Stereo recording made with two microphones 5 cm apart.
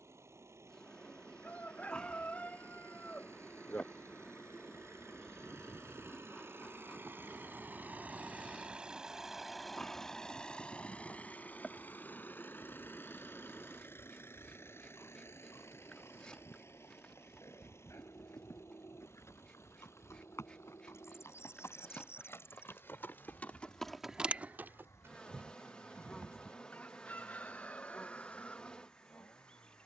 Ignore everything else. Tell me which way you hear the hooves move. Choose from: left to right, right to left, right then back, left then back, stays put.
left to right.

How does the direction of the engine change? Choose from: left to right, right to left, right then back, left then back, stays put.
right to left.